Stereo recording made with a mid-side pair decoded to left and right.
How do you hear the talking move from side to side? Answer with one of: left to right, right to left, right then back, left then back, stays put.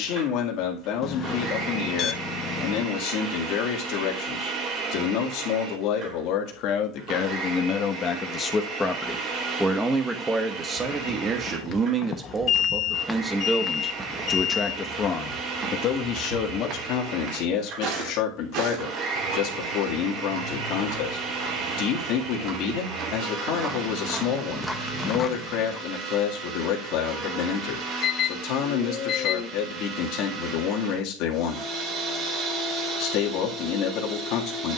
right then back.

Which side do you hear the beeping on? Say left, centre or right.
left.